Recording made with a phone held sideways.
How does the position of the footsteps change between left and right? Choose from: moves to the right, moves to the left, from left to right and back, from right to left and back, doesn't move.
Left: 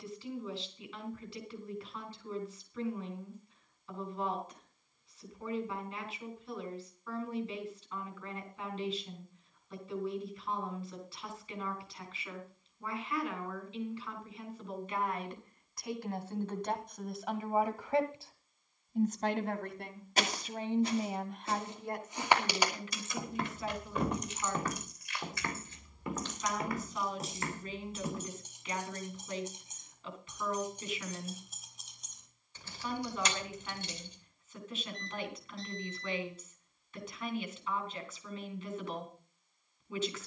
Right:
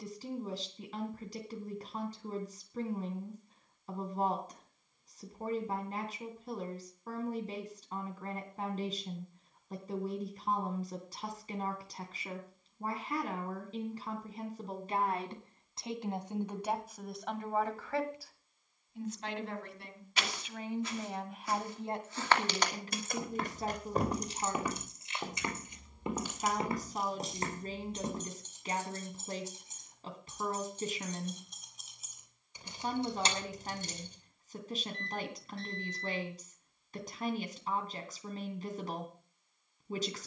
moves to the right.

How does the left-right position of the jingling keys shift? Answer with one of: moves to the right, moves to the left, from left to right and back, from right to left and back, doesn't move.
from right to left and back.